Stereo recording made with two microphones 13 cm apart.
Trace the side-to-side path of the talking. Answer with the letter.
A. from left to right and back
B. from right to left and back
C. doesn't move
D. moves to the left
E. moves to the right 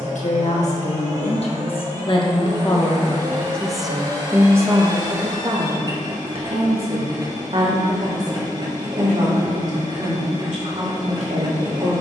E.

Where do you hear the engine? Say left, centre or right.
right.